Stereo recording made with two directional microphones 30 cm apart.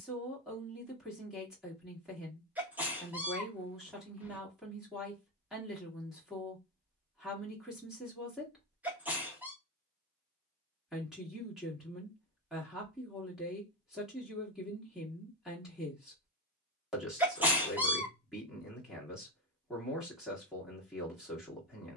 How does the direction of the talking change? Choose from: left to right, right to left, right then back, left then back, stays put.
stays put.